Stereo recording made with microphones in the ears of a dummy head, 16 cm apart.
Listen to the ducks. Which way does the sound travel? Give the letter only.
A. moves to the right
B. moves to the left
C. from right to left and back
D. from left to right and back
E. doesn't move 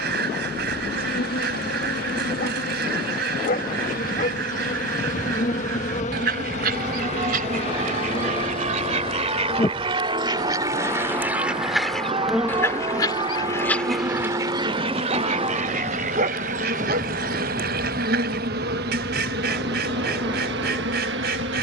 C.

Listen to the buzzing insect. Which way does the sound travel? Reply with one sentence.
In this clip you hear the buzzing insect move from left to right.